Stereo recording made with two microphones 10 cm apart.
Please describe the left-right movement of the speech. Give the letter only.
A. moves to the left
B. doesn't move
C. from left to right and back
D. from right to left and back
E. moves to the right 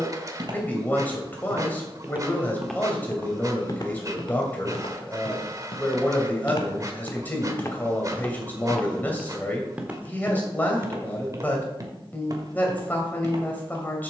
B.